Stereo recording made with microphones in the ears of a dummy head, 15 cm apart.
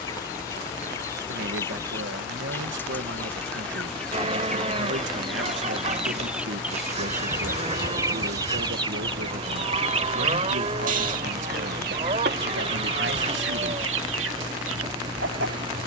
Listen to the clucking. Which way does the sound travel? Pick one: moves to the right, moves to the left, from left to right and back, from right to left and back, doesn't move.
moves to the right.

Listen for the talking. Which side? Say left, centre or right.
right.